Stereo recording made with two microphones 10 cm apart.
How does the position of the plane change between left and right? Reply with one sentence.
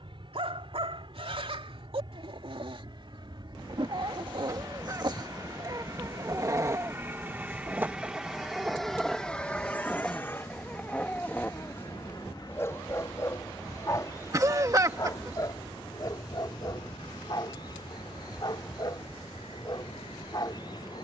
You can hear the plane go from the right side to the left.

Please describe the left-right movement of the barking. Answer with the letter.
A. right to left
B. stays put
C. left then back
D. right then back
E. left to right
A.